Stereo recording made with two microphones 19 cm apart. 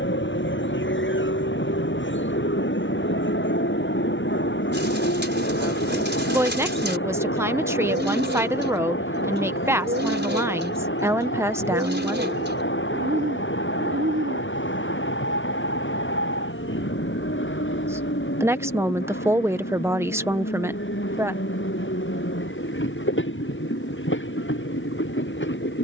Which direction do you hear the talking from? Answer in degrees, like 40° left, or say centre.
10° right.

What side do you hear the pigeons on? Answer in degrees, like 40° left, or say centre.
70° right.